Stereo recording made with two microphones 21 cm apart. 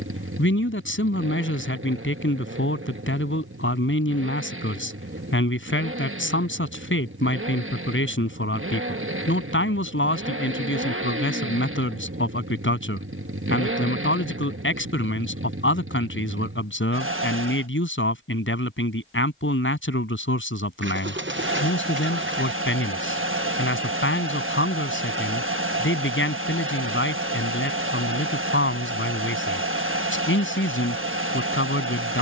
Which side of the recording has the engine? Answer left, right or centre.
right.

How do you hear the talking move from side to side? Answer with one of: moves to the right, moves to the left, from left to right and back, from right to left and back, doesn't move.
doesn't move.